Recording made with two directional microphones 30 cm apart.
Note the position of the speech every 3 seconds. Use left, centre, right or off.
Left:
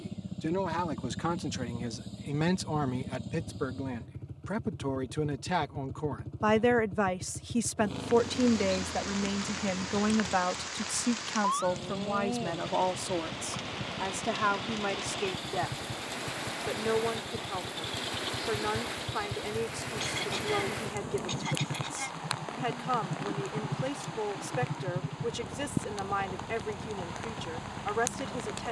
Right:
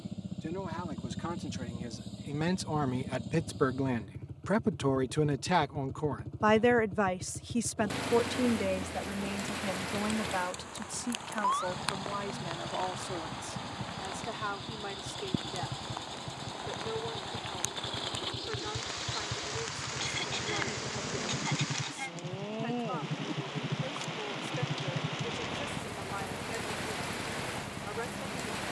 left, right, centre, left, left, left, left, left, left, left.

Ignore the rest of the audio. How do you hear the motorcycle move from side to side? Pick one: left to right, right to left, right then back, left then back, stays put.
stays put.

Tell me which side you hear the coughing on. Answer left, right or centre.
centre.